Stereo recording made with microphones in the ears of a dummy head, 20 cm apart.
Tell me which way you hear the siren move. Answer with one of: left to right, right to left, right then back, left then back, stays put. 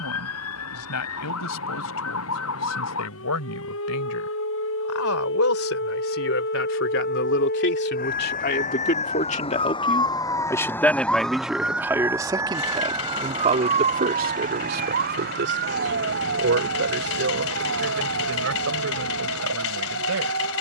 left to right.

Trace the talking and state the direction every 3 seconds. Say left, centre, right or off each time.
left, left, left, centre, right, right, right.